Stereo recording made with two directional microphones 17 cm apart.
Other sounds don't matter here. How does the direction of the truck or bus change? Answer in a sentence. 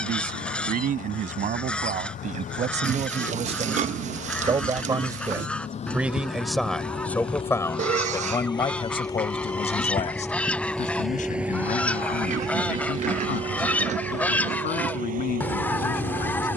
You can hear the truck or bus move to the right.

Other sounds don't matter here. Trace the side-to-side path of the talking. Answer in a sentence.
You can hear the talking travel towards the left.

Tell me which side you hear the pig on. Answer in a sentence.
In this clip you hear the pig on the right.